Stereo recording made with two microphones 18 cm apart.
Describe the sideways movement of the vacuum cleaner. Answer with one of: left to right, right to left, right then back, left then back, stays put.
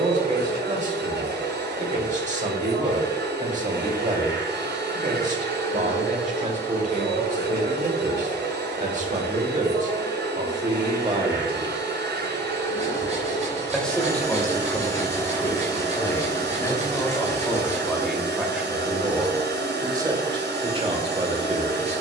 stays put.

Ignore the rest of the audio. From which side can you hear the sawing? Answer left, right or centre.
right.